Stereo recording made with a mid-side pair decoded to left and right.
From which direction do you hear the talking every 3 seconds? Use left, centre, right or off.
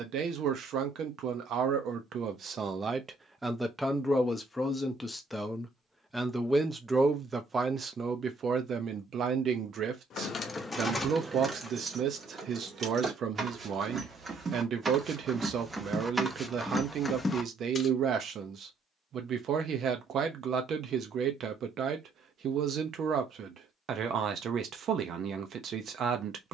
right, centre, right, right, right, right, right, right, right.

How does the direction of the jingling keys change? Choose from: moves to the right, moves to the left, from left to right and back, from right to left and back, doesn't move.
from left to right and back.